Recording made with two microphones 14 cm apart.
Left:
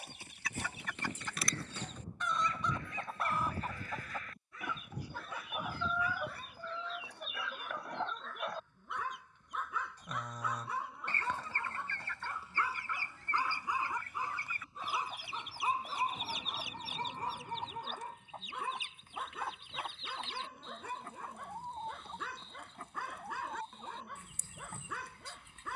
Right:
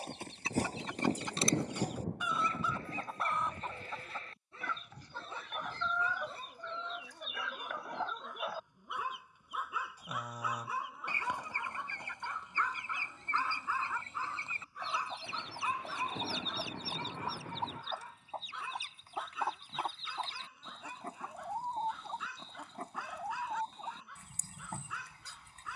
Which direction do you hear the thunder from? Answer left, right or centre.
right.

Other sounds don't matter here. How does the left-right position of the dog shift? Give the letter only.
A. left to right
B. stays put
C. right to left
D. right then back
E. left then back
C.